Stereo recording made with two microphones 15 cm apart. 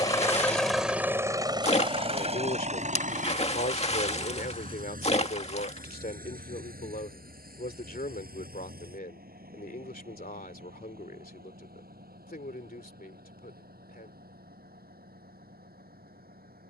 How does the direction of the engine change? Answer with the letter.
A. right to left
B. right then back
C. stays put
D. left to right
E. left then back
D.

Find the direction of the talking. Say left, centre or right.
left.